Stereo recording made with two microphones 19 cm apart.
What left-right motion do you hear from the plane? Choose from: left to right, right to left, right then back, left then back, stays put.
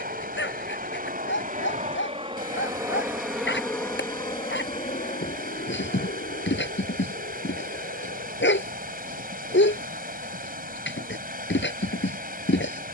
right to left.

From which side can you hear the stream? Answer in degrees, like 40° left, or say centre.
50° right.